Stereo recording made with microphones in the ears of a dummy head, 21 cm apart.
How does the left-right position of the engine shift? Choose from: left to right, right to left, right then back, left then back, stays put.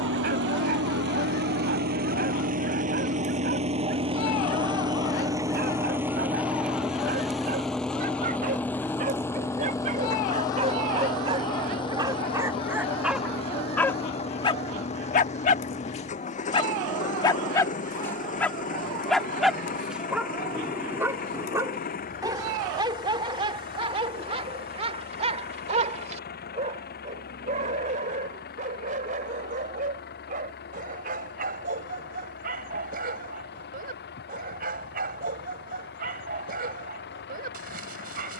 right to left.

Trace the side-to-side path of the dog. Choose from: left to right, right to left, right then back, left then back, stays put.
left then back.